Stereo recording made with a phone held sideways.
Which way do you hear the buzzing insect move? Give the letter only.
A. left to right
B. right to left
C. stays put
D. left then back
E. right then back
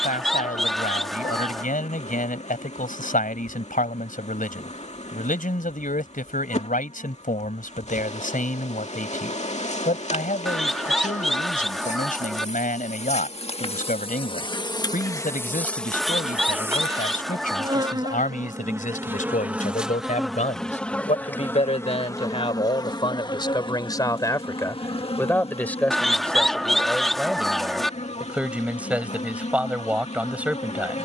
E.